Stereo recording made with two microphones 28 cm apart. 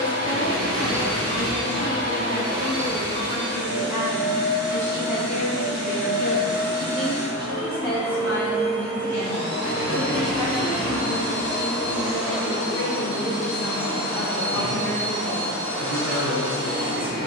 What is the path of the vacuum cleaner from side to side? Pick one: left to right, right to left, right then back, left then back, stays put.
stays put.